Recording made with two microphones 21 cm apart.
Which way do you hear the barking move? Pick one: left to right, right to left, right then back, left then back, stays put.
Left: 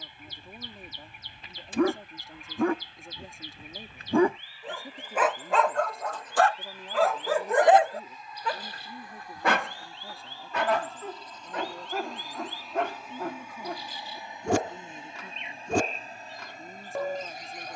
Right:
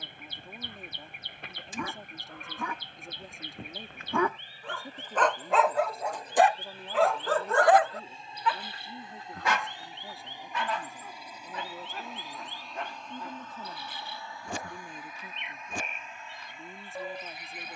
right then back.